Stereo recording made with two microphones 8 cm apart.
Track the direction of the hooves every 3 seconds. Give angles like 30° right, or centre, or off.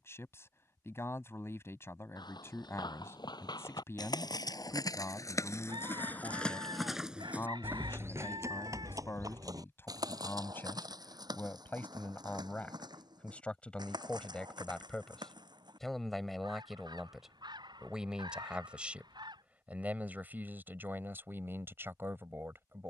80° left, 60° left, 20° right, 60° right, 70° right, 70° right, off, off.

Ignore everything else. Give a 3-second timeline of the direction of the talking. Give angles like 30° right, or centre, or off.
30° left, 30° left, 30° left, 30° left, 20° left, centre, 20° right, 30° right.